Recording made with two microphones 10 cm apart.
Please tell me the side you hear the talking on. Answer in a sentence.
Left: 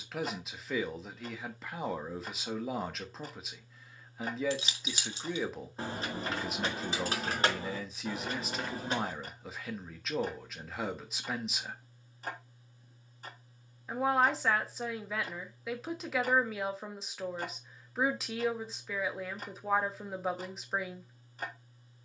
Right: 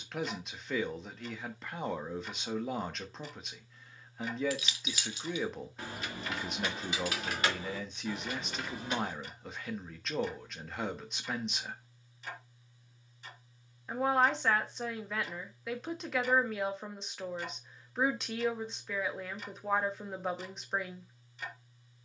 In this clip you hear the talking in the centre.